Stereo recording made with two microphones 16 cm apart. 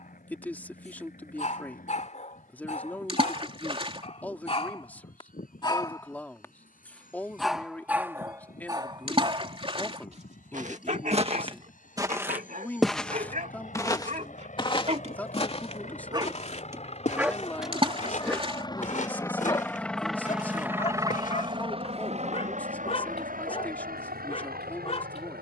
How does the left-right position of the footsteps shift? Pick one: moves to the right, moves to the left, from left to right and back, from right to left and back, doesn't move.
moves to the left.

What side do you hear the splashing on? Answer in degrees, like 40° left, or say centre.
40° right.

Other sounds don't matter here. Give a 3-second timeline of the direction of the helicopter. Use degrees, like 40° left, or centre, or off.
70° left, 70° left, 70° left, 60° left, 60° left, 50° left, 10° left, 50° right, 70° right.